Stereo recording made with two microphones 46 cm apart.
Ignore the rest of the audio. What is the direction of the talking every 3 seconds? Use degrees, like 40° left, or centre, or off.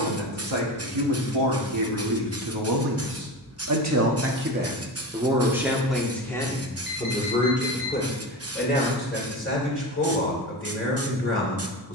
70° right, 20° right, 10° left, 20° left.